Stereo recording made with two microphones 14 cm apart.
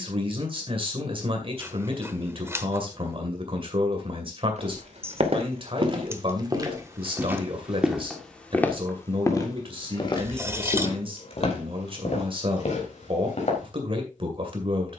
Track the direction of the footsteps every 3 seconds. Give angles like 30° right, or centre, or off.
off, 50° right, 10° right, 40° left, 60° left.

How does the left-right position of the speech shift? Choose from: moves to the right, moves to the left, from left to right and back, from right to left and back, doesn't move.
doesn't move.